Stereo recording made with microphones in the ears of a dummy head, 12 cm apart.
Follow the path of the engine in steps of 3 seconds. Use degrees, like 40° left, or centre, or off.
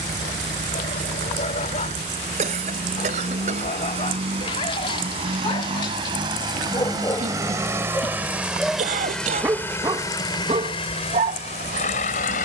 50° right, 40° right, 20° right, 30° left.